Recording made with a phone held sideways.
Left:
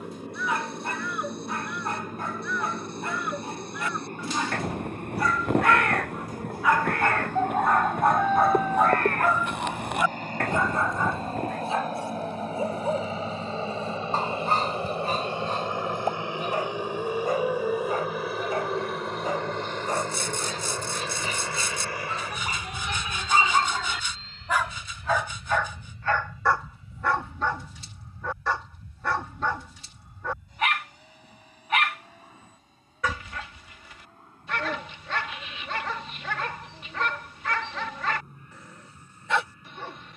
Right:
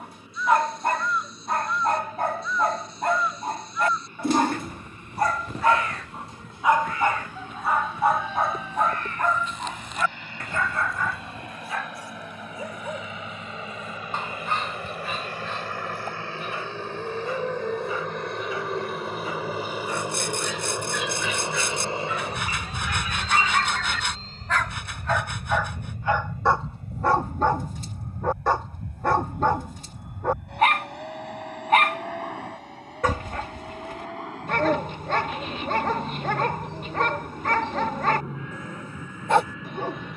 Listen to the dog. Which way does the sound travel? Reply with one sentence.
In this clip you hear the dog go left and come back.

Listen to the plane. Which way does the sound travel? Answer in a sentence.
In this clip you hear the plane move from left to right.